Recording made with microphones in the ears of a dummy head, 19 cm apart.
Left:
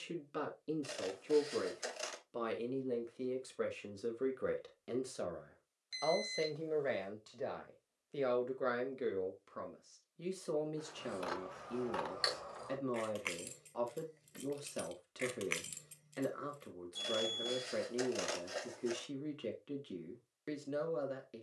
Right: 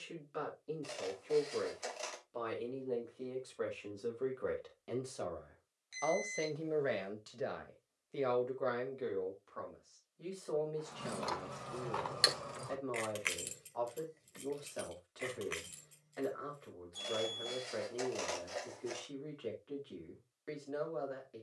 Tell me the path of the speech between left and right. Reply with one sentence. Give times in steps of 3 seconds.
In this clip you hear the speech on the left from 0 s, in the centre from 6 s and on the left from 9 s.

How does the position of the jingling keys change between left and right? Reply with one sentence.
In this clip you hear the jingling keys go from the right side to the left.